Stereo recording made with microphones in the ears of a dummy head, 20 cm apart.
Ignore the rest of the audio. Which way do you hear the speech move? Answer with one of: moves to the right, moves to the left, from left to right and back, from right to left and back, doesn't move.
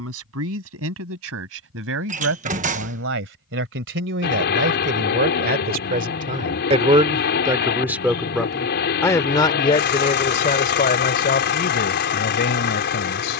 moves to the left.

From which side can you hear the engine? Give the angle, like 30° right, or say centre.
50° left.